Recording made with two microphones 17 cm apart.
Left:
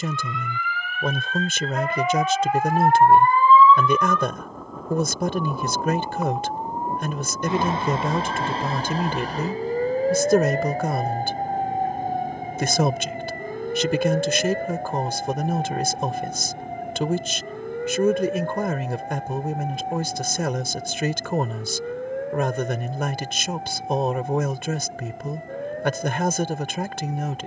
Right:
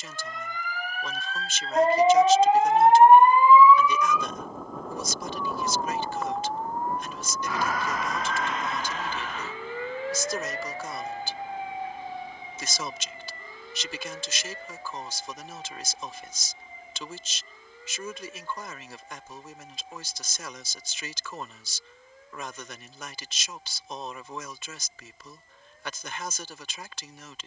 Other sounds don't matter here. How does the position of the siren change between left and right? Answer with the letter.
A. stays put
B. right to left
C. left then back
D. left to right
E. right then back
B.